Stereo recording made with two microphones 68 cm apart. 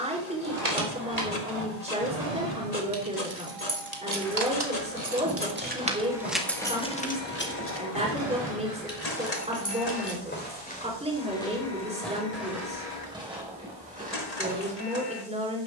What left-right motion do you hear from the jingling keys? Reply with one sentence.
You can hear the jingling keys move from right to left.